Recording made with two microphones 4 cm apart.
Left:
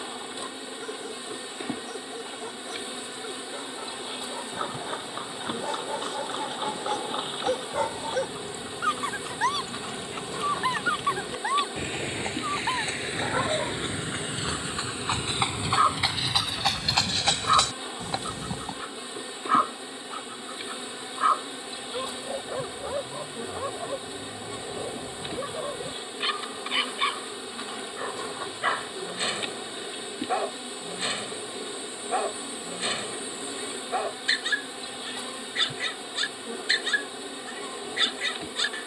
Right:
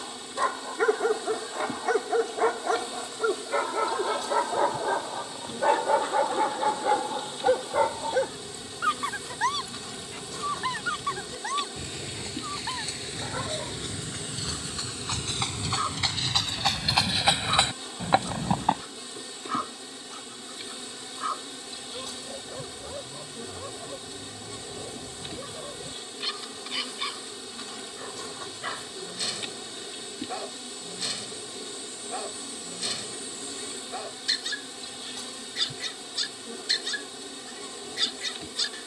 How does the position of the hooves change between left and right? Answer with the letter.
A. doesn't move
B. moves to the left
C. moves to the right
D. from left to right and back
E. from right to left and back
C.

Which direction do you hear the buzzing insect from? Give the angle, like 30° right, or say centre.
20° left.